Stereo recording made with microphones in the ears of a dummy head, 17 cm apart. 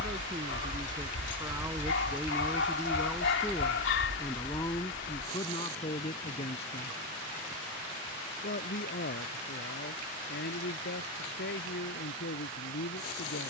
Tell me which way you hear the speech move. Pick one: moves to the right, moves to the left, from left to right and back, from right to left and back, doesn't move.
moves to the left.